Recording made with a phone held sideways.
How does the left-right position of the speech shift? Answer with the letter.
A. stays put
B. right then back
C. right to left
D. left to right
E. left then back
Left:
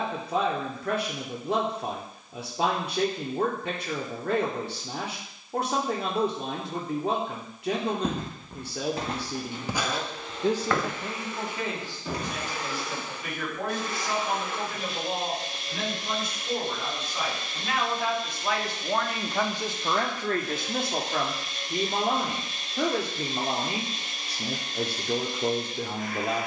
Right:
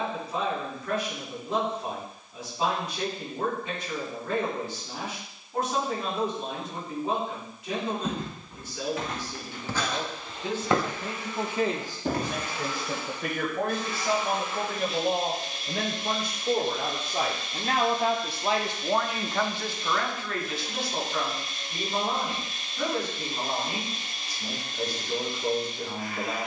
B.